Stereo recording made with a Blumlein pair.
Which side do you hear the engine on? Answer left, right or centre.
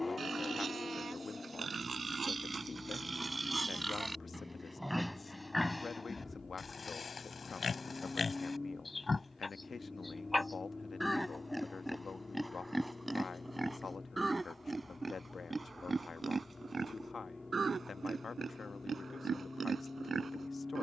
centre.